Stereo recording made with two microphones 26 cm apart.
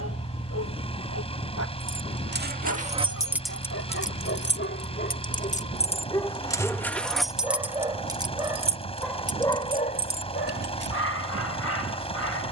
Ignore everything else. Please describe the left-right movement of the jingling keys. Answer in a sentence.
In this clip you hear the jingling keys move from right to left and back again.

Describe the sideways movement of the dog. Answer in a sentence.
In this clip you hear the dog move from left to right and back again.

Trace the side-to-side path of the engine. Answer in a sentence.
In this clip you hear the engine stay in one place.